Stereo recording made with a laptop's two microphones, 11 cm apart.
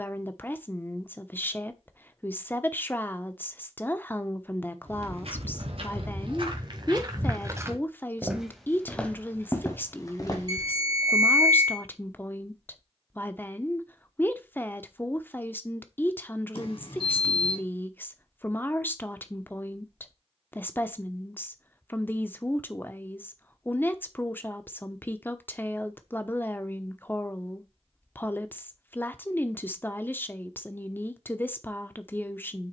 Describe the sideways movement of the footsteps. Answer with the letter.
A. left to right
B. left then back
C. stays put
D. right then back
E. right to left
E.